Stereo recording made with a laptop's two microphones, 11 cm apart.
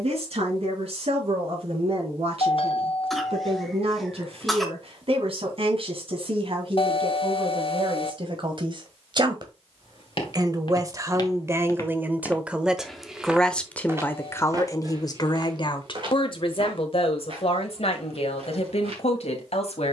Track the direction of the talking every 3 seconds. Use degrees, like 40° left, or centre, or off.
60° right, 60° right, 50° right, 30° right, 10° left, 50° left, 70° left.